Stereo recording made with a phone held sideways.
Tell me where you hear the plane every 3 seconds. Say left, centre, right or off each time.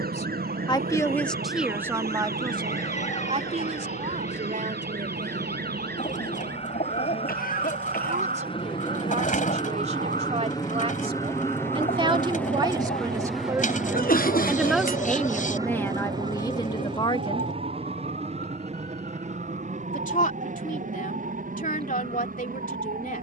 left, left, left, left, centre, right, right, right.